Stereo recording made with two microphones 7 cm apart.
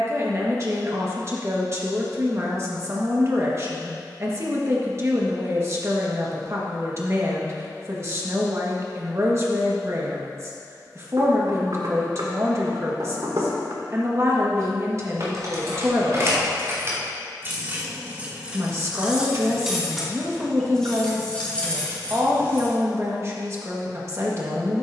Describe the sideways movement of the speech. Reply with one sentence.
You can hear the speech stay in one place.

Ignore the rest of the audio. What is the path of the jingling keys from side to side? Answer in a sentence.
You can hear the jingling keys move to the left.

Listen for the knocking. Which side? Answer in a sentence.
In this clip you hear the knocking on the right.